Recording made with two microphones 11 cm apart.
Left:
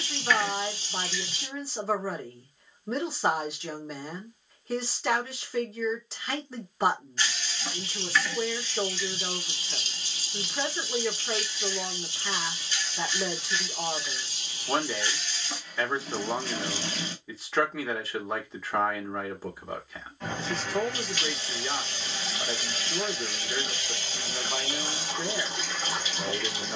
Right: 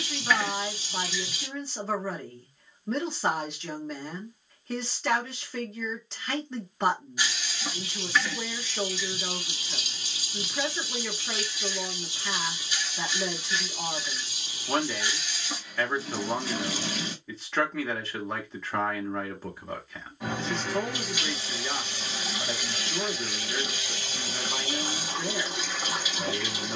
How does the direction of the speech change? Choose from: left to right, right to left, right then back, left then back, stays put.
stays put.